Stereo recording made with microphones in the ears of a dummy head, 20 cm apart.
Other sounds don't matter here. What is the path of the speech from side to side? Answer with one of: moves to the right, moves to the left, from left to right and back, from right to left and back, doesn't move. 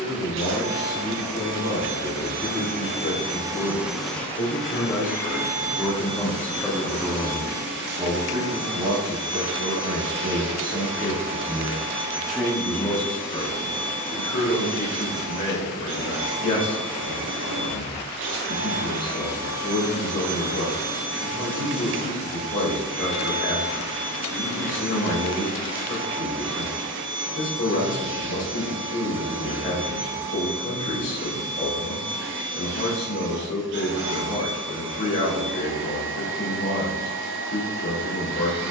from left to right and back.